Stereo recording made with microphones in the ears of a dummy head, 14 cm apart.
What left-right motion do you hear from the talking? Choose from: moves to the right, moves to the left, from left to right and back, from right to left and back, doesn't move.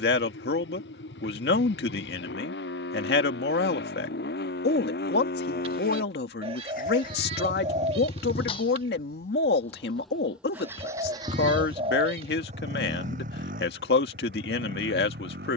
doesn't move.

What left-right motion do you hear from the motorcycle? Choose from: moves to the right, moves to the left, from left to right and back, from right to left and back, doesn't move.
moves to the right.